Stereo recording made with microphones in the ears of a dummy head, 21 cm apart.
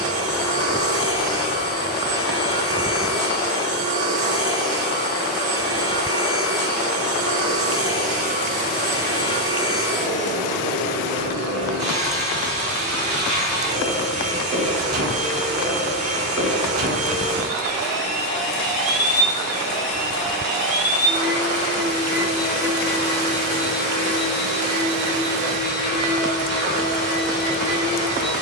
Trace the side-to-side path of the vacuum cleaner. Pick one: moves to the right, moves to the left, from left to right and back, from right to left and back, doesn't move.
doesn't move.